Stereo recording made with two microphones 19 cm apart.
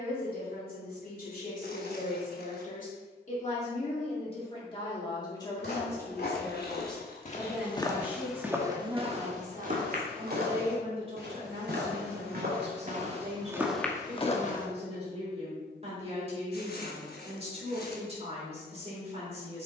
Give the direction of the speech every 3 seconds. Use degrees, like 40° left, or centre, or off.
50° left, 30° left, centre, 30° right, 40° right, 40° right, 40° right.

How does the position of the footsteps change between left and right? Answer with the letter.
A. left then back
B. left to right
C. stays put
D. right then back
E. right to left
D.